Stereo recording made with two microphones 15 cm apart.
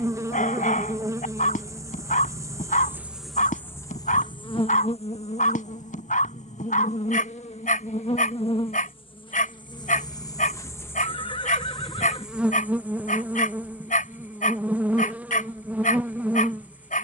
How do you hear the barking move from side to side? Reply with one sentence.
You can hear the barking stay put.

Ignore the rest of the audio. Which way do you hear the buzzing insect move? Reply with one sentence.
In this clip you hear the buzzing insect move from right to left and back again.